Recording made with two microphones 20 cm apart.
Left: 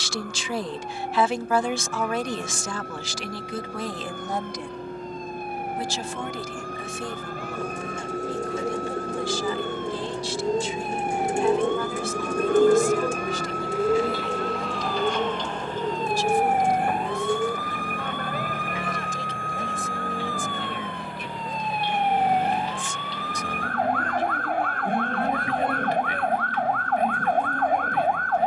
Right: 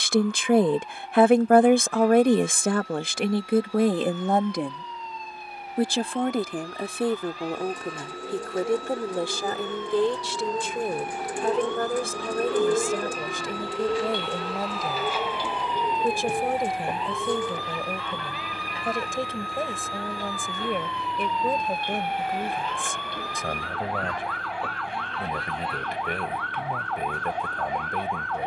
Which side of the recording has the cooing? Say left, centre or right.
left.